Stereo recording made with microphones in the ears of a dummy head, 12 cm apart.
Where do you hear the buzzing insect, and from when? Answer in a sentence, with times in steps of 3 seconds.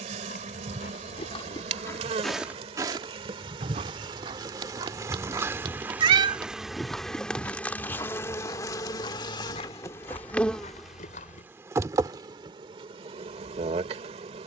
In this clip you hear the buzzing insect on the right from 0 s, in the centre from 6 s and on the right from 12 s.